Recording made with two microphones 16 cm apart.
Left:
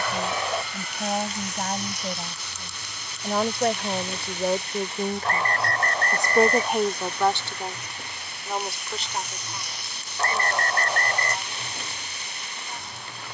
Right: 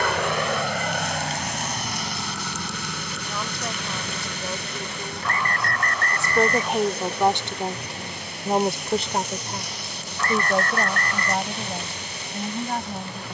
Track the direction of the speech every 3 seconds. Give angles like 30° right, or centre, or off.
70° left, 50° left, 10° right, 60° right, 70° right.